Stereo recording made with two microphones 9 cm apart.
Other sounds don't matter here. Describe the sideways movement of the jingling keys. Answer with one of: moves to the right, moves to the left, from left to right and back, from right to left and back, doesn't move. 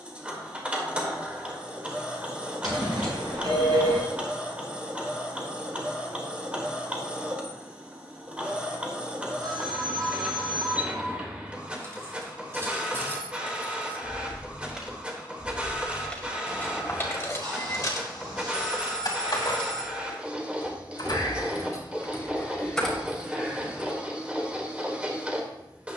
from right to left and back.